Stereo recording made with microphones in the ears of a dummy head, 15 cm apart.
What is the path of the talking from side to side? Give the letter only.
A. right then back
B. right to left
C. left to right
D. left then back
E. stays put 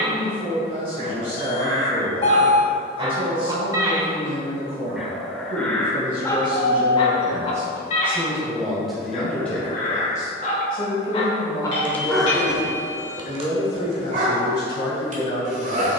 B.